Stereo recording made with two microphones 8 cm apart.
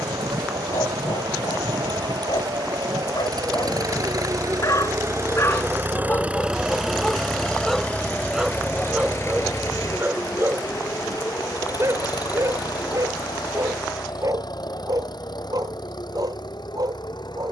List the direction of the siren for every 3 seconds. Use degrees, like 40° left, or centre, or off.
60° right, 40° right, centre, 30° left, 40° left, 50° left.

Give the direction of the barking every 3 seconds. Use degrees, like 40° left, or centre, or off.
70° left, 50° left, 10° left, 30° right, 50° right, 50° right.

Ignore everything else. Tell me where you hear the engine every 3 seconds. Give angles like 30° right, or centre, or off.
70° right, 50° right, 10° left, 50° left, 60° left, 70° left.